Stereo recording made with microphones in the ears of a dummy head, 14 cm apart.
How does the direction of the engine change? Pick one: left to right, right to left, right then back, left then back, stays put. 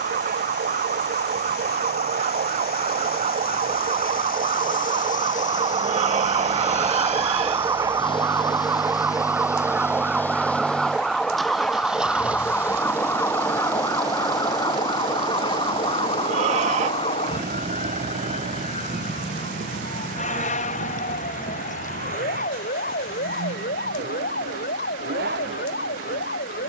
left to right.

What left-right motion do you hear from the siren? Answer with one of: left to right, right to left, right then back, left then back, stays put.
right to left.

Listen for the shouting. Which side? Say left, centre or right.
right.